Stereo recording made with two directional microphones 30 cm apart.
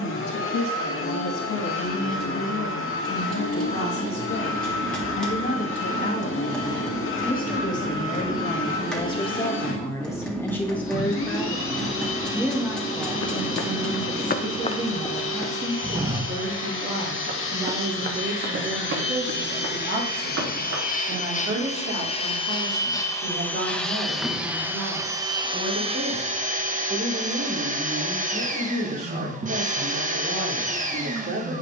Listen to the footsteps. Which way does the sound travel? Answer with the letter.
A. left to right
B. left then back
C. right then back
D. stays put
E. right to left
A.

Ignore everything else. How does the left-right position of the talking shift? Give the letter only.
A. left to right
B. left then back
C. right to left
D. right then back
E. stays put
A.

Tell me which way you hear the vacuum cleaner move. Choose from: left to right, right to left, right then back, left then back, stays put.
left to right.